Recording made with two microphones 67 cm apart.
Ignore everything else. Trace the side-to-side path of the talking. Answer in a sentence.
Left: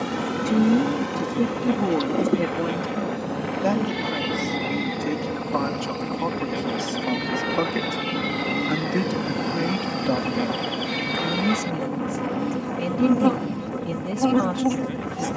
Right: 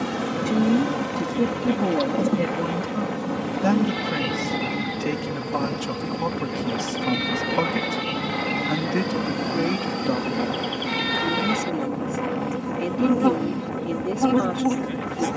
In this clip you hear the talking move from left to right and back again.